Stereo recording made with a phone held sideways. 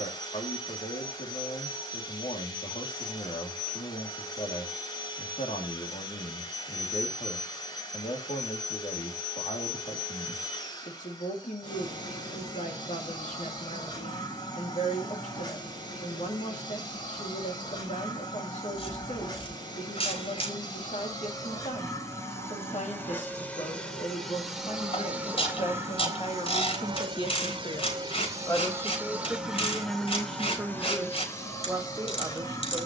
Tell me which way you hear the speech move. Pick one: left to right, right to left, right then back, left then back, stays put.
left to right.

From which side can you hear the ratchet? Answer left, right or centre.
left.